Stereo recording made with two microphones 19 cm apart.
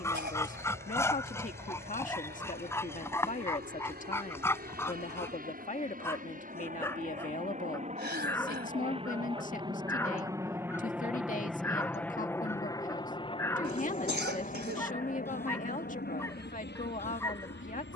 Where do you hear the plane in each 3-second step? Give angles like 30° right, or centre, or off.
60° right, 60° right, 40° right, 10° right, 30° left, 50° left.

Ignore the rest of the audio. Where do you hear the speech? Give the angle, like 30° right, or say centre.
40° left.